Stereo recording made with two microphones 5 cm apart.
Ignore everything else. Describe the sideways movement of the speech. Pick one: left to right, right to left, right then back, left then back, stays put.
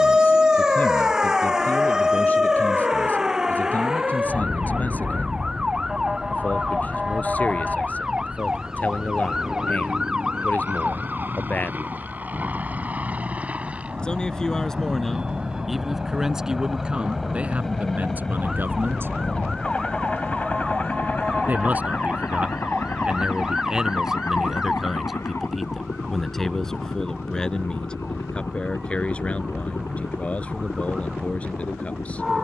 right then back.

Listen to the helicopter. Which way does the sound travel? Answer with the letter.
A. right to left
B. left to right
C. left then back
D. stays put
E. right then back
A.